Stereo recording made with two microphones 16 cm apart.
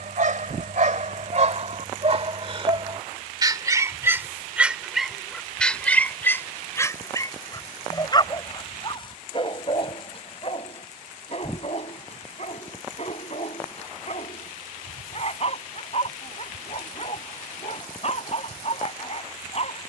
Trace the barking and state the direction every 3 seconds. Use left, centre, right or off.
right, centre, left, left, left, left, left.